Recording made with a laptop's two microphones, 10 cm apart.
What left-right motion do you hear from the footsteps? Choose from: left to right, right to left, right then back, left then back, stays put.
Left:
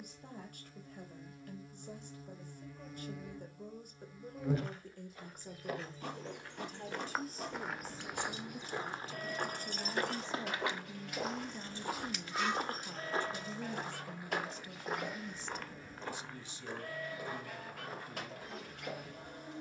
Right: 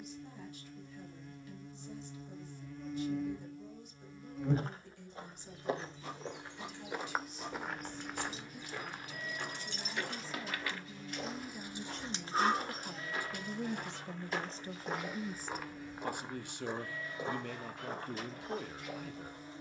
left then back.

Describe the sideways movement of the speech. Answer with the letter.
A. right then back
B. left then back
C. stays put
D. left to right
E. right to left
D.